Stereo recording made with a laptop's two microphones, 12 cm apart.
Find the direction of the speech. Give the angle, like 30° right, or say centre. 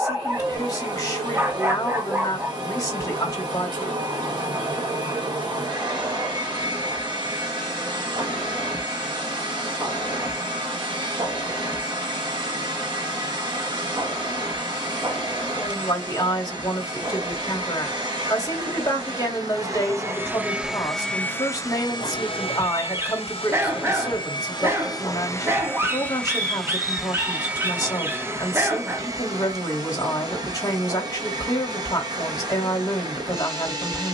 30° left.